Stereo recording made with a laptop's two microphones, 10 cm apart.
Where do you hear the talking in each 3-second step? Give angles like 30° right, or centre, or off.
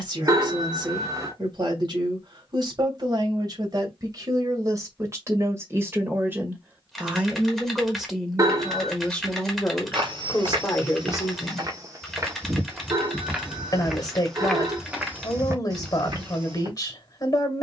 50° right, 30° right, 10° right, 20° left, 40° left, 40° left.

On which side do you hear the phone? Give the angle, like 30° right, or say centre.
30° right.